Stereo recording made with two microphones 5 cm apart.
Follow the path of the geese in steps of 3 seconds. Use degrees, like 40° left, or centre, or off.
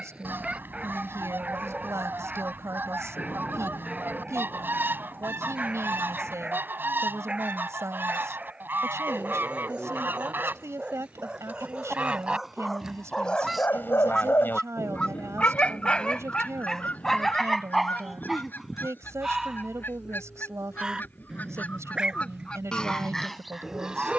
40° right, 40° right, 40° right, 40° right, 10° right, 30° left, 40° left, 20° left.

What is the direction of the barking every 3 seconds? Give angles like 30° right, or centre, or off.
20° right, 20° right, 20° right, 20° right, 20° left, 10° left, 10° right, 20° right.